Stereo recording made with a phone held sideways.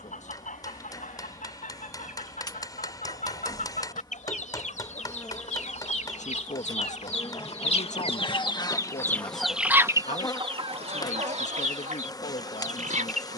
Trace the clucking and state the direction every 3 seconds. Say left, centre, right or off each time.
left, left, left, right, right.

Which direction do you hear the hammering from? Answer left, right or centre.
left.